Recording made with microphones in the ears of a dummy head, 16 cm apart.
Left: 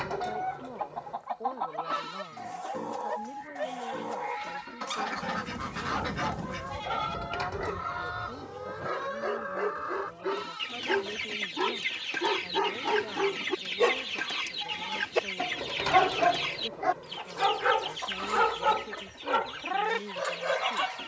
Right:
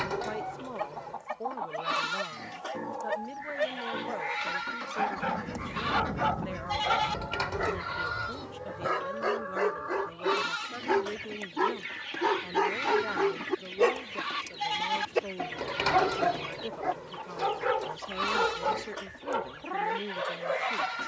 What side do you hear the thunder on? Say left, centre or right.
centre.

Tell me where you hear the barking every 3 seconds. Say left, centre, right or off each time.
right, right, right, right, centre, left, left.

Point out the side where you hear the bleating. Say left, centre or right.
right.